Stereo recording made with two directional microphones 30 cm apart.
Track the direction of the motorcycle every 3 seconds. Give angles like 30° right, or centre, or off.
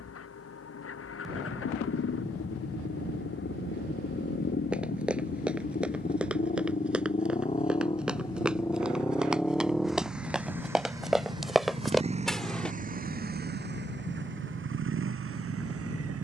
50° left, 40° left, 20° left, 10° right, 30° right, 50° right.